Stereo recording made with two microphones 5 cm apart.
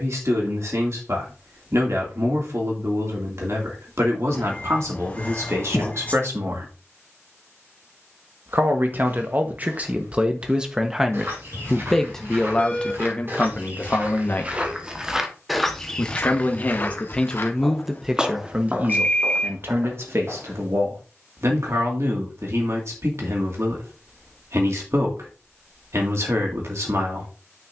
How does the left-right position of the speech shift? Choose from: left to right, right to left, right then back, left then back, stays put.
left then back.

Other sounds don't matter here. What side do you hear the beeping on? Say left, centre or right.
left.